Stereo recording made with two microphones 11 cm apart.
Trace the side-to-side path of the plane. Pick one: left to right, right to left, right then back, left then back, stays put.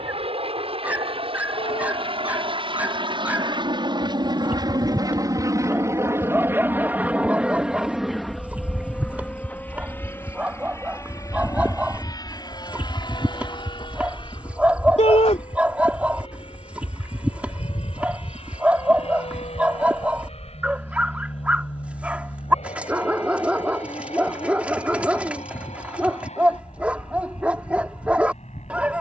right to left.